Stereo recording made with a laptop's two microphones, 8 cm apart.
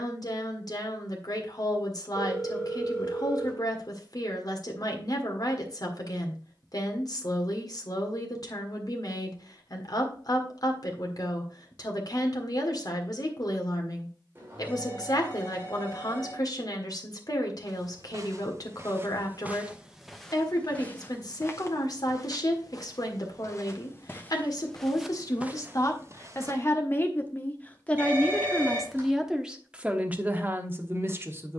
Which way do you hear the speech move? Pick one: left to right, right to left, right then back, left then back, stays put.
left to right.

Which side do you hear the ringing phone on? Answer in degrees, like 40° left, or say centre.
30° right.